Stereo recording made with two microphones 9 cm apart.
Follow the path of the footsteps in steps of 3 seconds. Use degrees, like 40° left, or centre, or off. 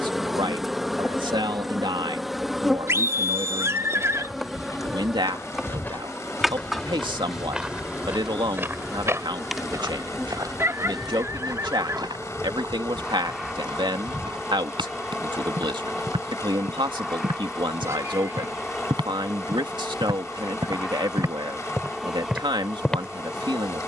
off, 30° left, 10° right, 40° right, 60° right, 70° right, 60° right, 10° right.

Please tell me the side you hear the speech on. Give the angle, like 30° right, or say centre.
60° right.